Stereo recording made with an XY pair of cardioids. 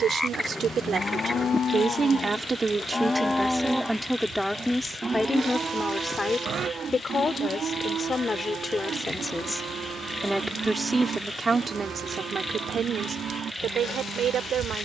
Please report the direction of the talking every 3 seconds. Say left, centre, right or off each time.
right, centre, left, centre, right.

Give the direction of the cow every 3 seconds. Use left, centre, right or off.
left, centre, right, right, right.